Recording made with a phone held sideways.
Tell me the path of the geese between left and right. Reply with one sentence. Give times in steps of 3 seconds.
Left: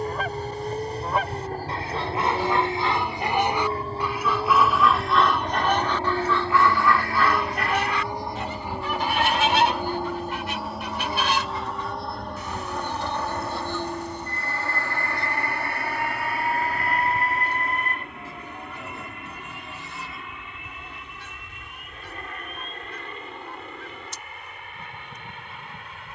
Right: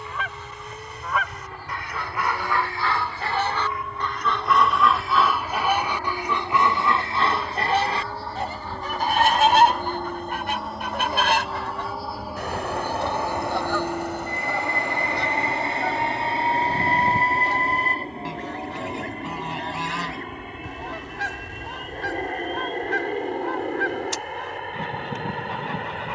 You can hear the geese on the left from 0 s, in the centre from 3 s and on the right from 6 s.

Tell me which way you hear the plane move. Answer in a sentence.
You can hear the plane travel towards the right.